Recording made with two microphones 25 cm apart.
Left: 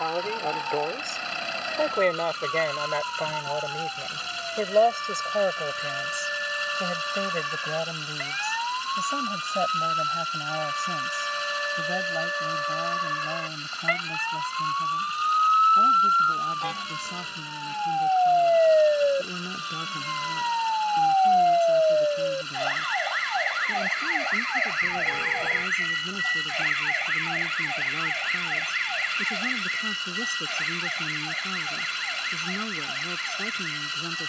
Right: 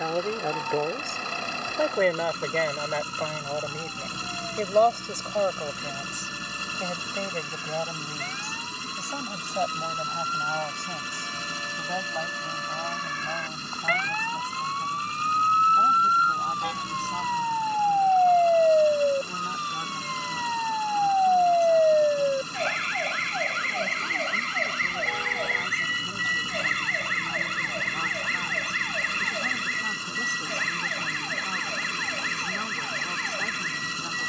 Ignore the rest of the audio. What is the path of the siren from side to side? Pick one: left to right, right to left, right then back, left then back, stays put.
left to right.